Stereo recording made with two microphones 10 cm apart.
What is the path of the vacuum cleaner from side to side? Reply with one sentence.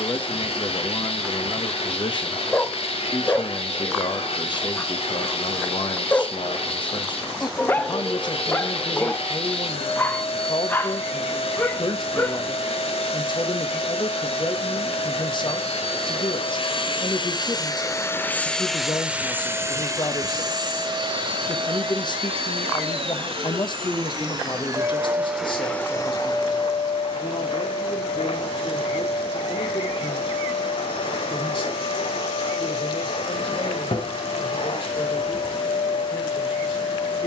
You can hear the vacuum cleaner move from left to right and back again.